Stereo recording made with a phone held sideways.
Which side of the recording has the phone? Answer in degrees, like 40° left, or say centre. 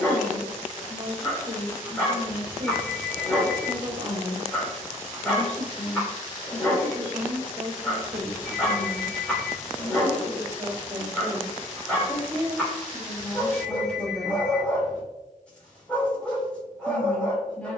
20° left.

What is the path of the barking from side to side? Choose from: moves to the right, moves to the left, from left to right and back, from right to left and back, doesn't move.
doesn't move.